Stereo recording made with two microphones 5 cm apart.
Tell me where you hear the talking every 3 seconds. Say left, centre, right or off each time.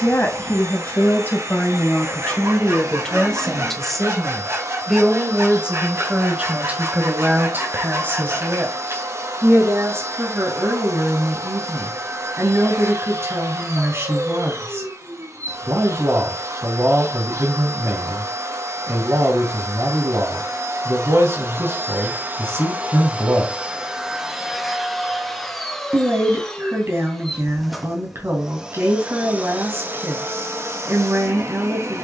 left, centre, right, right, right, right, right, right, right, right, right.